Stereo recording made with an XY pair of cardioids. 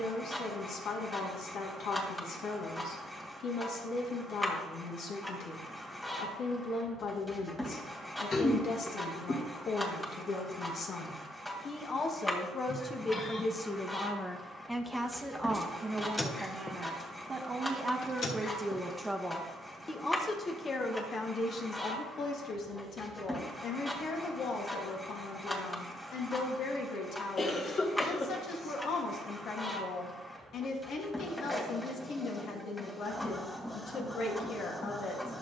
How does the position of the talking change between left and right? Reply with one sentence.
In this clip you hear the talking go right and come back.